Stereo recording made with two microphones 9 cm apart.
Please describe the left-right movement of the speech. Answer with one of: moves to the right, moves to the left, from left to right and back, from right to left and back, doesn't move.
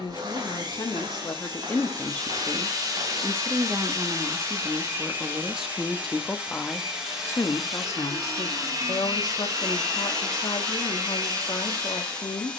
from left to right and back.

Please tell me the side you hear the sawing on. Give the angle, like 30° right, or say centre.
40° right.